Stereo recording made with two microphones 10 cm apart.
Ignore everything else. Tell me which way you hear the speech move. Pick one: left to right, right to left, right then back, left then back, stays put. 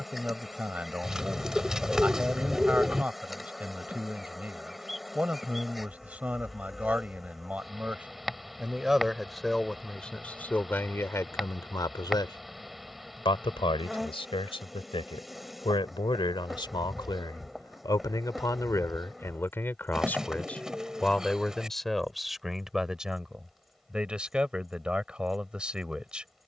left then back.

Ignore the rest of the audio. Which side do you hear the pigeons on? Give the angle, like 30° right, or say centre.
10° right.